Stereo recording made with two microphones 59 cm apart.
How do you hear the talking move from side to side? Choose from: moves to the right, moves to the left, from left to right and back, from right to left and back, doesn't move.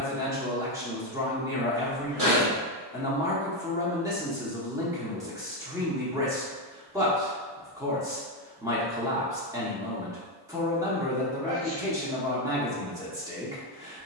doesn't move.